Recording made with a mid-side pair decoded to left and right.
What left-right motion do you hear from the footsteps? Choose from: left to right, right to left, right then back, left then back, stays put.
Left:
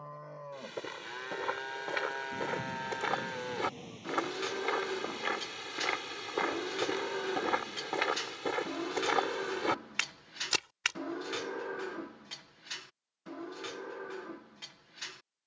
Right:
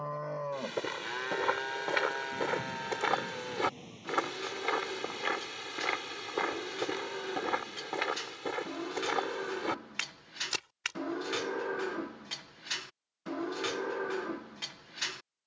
right to left.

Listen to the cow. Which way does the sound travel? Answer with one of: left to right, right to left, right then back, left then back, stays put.
left then back.